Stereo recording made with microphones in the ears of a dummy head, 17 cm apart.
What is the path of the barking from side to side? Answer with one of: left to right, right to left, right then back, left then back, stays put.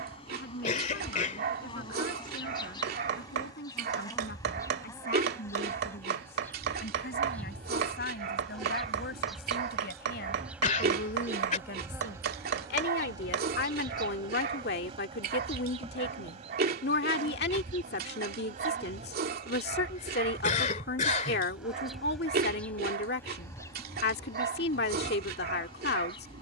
stays put.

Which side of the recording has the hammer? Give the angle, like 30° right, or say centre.
60° right.